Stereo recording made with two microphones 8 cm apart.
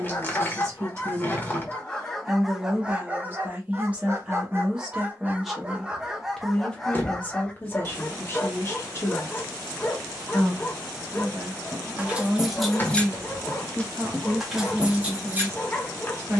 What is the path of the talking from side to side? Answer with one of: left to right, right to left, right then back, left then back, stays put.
left then back.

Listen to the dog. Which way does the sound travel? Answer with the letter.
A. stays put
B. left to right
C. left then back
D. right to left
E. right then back
E.